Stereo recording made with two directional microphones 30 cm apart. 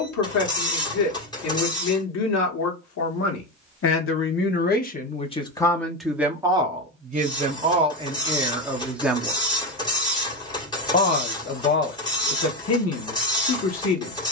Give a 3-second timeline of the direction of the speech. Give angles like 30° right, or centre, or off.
60° left, 30° left, 10° right, 20° left, 50° left.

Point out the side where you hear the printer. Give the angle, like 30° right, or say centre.
10° left.